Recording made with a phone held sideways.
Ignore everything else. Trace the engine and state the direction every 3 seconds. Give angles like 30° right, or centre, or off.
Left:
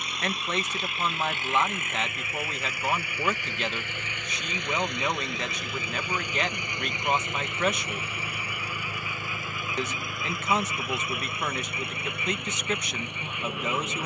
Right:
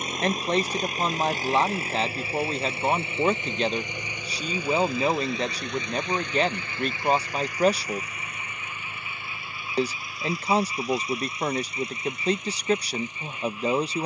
30° right, 10° right, 20° left, 50° left, 60° left.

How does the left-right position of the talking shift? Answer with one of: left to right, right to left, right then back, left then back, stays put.
stays put.